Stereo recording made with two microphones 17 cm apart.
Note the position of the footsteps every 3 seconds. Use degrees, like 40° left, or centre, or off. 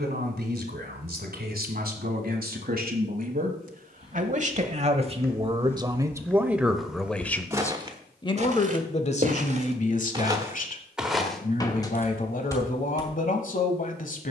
off, 20° left, 10° right, 20° right, 20° left.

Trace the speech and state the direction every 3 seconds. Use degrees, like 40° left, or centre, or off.
70° right, 40° right, 10° left, 50° left, 50° left.